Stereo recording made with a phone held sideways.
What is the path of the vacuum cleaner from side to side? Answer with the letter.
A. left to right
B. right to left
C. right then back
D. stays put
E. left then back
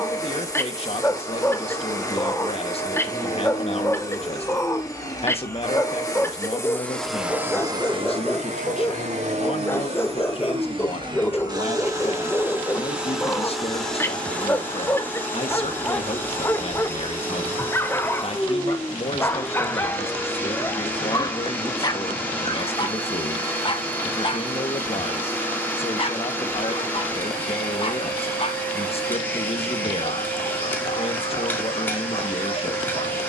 C.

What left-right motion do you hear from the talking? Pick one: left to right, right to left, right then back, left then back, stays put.
stays put.